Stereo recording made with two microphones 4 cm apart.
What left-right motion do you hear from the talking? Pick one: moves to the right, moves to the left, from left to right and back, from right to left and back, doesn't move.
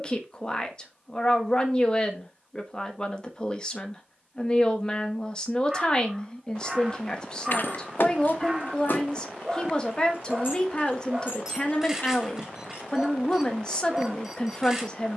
doesn't move.